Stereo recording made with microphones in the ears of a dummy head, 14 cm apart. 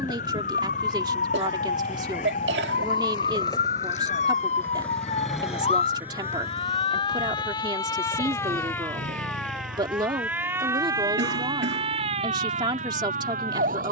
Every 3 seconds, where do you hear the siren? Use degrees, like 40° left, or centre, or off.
60° left, 50° left, 30° left, 10° right, 50° right.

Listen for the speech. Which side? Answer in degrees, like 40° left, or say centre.
30° right.